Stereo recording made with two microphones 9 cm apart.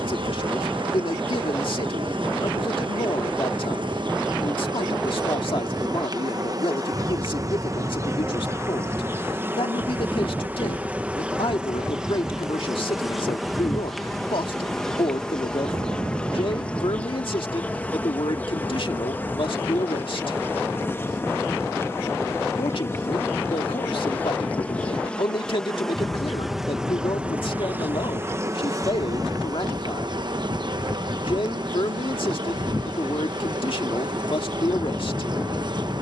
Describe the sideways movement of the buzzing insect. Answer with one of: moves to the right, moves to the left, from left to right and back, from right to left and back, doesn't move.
from right to left and back.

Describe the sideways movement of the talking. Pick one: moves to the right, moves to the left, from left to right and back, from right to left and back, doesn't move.
doesn't move.